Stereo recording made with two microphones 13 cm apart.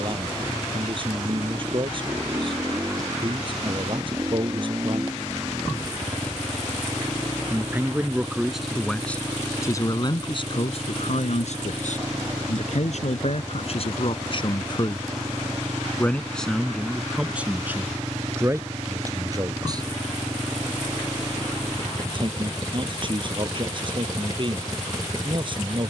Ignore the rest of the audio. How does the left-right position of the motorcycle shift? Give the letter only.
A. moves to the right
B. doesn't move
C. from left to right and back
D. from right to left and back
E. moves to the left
B.